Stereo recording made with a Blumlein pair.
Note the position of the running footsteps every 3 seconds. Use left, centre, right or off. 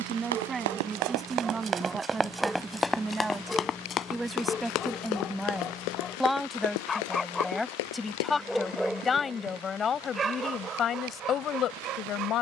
right, left, left, off.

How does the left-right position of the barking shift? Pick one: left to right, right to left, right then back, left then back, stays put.
left then back.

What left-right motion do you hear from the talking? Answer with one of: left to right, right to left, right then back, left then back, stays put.
right to left.